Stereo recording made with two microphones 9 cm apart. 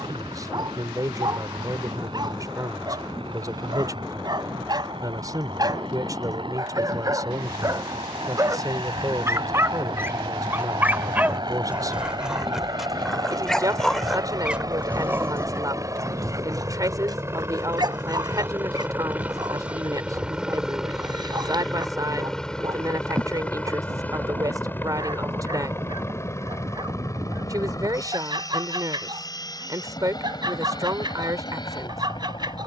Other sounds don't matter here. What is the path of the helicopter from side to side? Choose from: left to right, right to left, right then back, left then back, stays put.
right to left.